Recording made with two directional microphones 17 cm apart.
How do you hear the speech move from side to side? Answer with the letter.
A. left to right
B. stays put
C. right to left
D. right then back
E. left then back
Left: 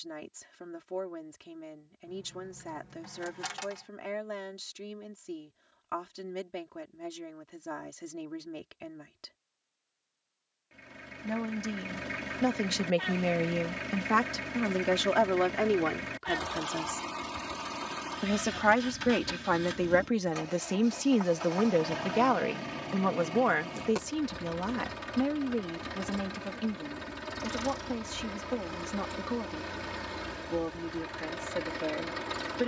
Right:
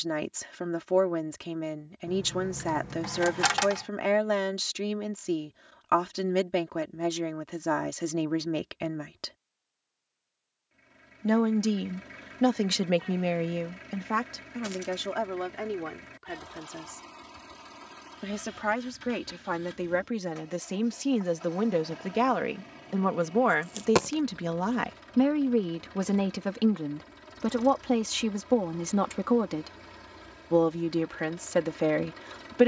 E.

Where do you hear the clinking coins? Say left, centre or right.
right.